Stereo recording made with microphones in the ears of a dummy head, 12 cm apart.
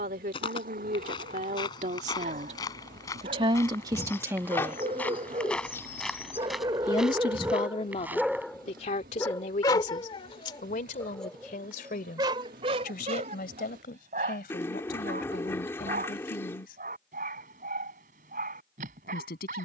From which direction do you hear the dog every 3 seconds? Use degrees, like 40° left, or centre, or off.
60° right, 50° right, 10° right, 20° left, 50° right, 60° right, 60° right.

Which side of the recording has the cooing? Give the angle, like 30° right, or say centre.
20° left.